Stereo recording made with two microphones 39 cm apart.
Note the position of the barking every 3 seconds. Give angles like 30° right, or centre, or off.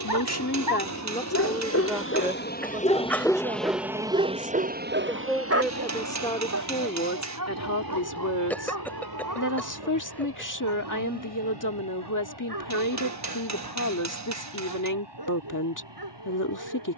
40° left, 20° right, 50° right, 60° right, 70° right, 70° right.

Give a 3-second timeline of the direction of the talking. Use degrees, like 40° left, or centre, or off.
10° left, 10° right, 40° left, 50° left, 50° left, 50° left.